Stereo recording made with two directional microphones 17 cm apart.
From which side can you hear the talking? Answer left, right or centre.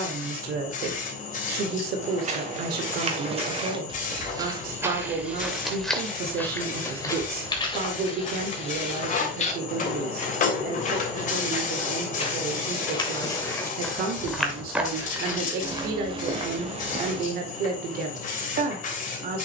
right.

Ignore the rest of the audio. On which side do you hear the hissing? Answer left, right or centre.
left.